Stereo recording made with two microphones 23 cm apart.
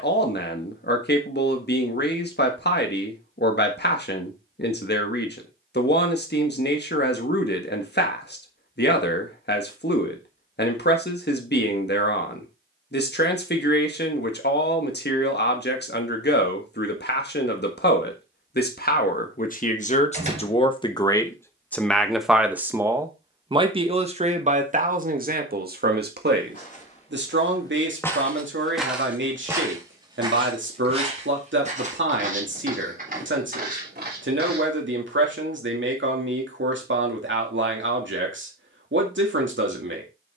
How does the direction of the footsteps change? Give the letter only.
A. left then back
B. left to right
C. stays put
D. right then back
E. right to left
B.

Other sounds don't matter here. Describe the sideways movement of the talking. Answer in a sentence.
You can hear the talking move to the right.